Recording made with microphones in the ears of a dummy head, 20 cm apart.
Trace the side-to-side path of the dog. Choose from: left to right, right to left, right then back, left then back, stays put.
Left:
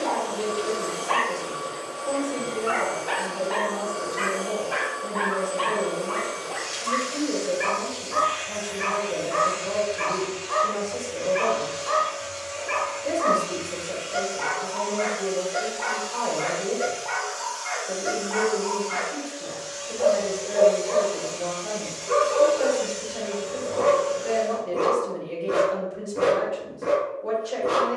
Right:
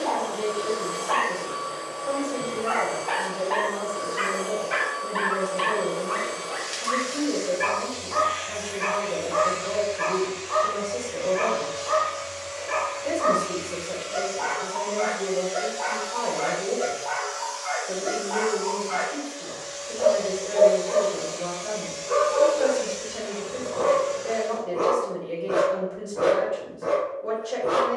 right then back.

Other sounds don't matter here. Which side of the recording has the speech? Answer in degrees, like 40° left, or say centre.
centre.